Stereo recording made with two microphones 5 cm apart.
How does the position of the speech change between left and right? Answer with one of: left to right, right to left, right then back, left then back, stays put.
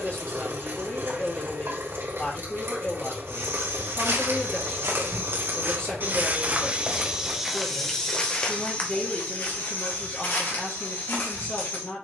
stays put.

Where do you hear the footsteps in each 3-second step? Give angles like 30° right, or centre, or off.
off, 60° right, centre, 50° left.